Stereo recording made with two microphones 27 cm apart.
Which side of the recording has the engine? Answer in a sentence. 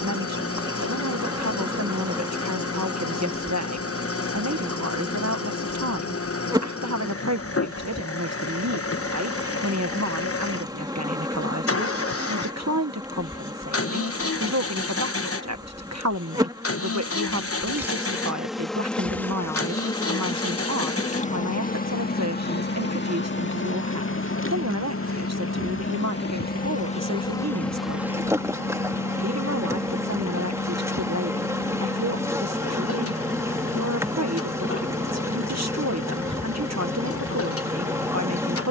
You can hear the engine on the left.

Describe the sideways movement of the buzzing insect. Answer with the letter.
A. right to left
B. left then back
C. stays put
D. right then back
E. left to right
B.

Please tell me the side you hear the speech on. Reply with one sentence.
You can hear the speech on the right.